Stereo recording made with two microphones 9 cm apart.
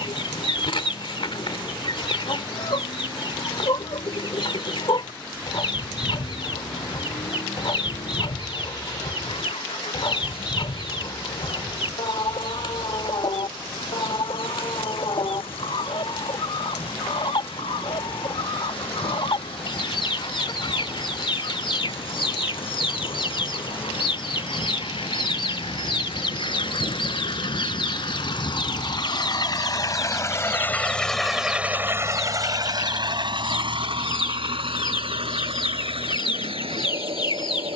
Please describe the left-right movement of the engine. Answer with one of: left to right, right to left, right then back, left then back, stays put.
left to right.